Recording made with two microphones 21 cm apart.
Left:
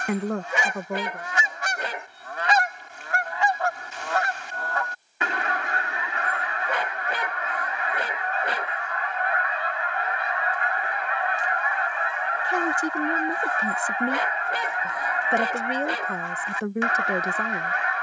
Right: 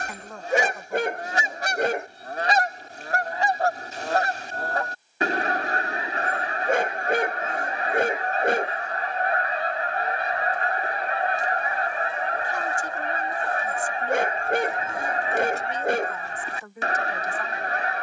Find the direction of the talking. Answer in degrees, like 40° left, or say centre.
70° left.